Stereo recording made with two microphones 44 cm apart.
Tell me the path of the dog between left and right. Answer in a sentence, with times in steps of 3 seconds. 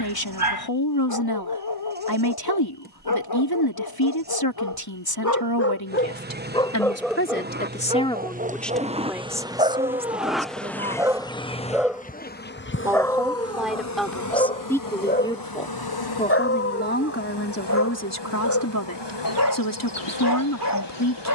You can hear the dog on the left from 0 s, in the centre from 6 s and on the left from 15 s.